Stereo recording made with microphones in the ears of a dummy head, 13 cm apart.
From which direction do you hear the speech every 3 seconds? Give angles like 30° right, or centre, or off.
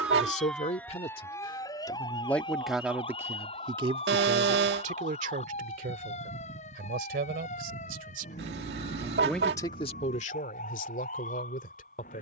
30° left, 40° right, 60° right, 40° left.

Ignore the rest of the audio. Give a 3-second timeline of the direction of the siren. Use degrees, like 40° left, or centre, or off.
20° left, 40° left, 50° left, 50° left.